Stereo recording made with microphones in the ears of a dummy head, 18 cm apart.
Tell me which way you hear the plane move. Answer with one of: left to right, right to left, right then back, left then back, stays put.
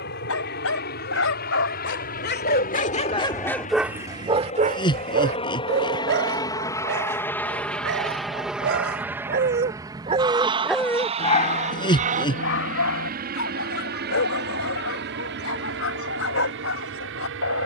left to right.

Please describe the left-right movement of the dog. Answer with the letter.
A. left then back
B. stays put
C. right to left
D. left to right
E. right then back
E.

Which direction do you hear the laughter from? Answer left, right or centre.
left.